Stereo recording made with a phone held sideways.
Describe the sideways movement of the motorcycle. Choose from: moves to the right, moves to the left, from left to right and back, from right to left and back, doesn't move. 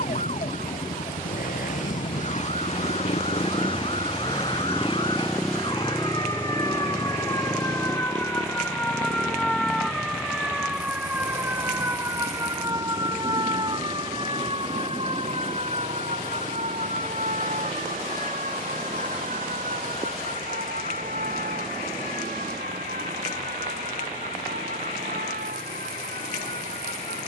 moves to the right.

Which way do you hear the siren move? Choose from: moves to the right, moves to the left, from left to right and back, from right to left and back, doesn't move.
moves to the right.